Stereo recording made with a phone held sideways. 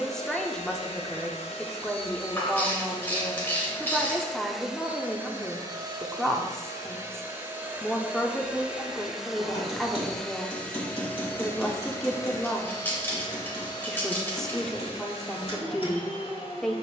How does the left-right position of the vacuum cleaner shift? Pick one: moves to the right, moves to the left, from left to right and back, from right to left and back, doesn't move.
from left to right and back.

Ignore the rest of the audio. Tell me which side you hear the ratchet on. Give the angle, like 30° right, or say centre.
20° left.